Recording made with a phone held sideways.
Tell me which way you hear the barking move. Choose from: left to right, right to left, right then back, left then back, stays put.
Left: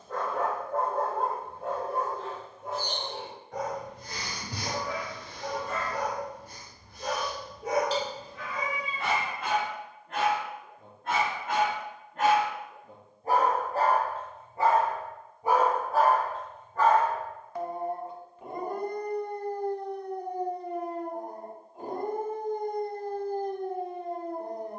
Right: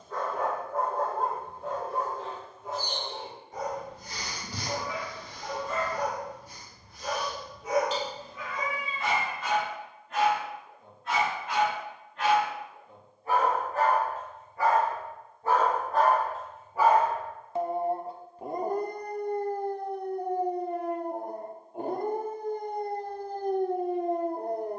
left to right.